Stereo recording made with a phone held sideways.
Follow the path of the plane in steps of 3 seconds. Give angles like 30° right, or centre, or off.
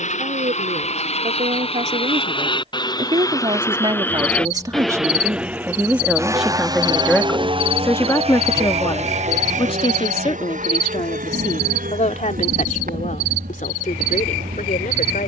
40° left, 10° left, 30° right, 50° right, 60° right.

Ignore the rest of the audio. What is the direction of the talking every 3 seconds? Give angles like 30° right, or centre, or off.
50° right, 30° right, 10° left, 40° left, 60° left.